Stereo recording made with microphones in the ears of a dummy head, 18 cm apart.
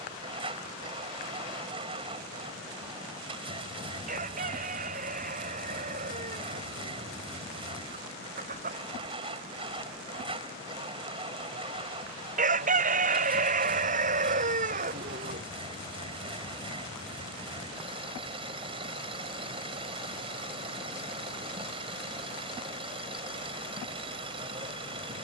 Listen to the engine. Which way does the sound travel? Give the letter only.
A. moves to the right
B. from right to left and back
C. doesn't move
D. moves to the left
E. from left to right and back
C.